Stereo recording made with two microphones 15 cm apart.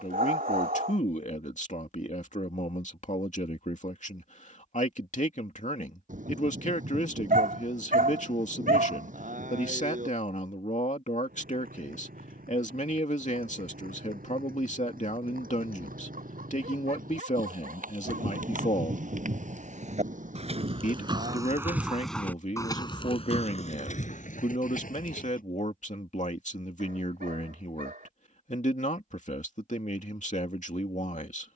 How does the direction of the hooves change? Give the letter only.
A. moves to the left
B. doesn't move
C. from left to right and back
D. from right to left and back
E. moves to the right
A.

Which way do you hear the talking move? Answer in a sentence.
In this clip you hear the talking stay in one place.